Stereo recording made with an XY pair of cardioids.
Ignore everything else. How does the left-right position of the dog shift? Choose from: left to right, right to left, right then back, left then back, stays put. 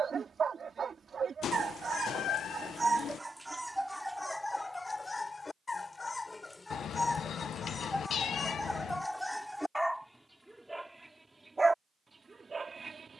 left then back.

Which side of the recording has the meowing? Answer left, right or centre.
left.